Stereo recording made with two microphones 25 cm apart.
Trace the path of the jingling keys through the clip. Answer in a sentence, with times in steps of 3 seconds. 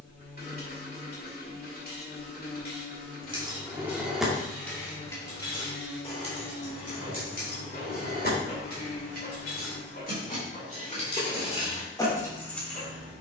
In this clip you hear the jingling keys not at all from 0 s, in the centre from 3 s, on the left from 6 s and in the centre from 12 s.